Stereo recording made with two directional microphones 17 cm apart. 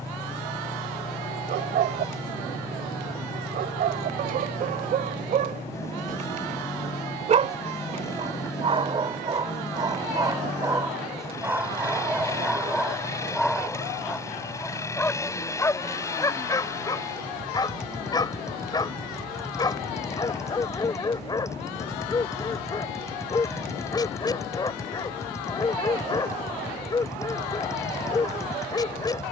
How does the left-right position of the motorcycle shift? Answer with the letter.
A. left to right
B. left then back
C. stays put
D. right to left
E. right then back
C.